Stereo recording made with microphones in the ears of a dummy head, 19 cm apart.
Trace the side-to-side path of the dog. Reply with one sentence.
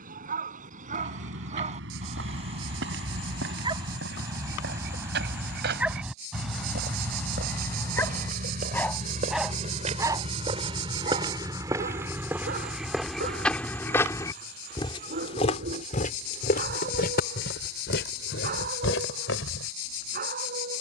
In this clip you hear the dog move from right to left and back again.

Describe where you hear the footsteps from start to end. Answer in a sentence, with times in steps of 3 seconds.
You can hear the footsteps on the right from 0 s, in the centre from 12 s and on the left from 15 s.